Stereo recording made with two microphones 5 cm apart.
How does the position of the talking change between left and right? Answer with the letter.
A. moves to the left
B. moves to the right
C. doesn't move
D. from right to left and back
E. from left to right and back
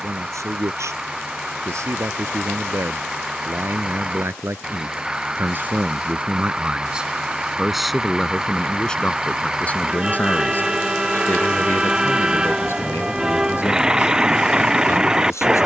A.